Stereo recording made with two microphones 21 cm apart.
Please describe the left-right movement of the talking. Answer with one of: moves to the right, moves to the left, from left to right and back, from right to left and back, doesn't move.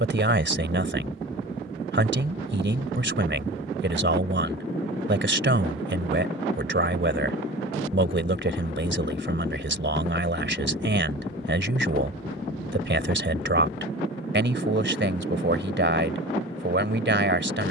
doesn't move.